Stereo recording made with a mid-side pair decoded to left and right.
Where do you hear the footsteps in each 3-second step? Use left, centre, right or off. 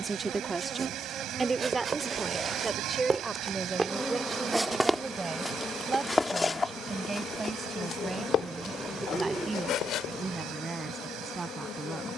right, centre, left, left.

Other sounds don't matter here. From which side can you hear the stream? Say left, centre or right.
right.